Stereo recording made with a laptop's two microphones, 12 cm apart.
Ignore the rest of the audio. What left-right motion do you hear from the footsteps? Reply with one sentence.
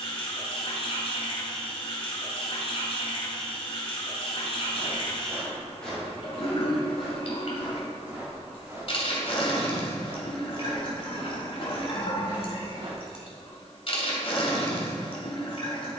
In this clip you hear the footsteps travel towards the right.